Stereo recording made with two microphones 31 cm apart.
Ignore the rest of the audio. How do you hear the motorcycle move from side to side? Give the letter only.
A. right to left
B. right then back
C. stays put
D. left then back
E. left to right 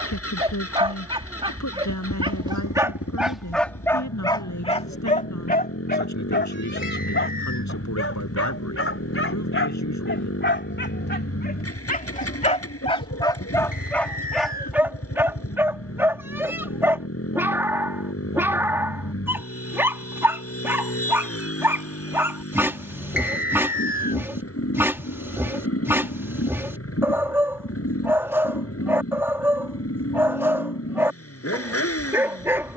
C.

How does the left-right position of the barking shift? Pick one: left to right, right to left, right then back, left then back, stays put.
left then back.